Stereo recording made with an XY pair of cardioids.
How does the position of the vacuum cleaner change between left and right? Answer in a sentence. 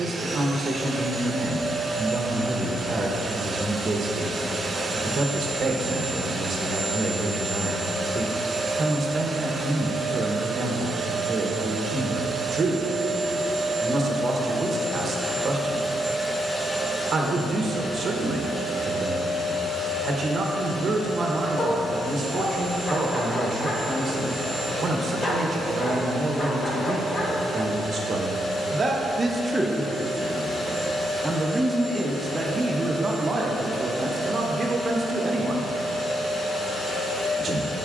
You can hear the vacuum cleaner go from the right side to the left.